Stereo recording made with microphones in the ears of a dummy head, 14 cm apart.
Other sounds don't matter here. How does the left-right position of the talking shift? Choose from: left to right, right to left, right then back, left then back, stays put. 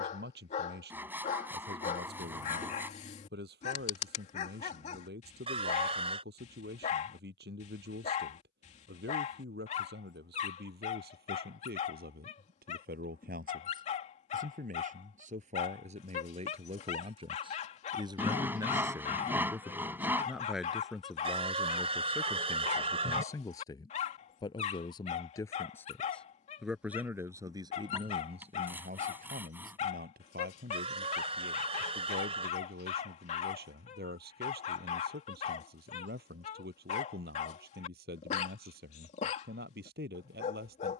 left then back.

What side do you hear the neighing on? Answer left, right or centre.
right.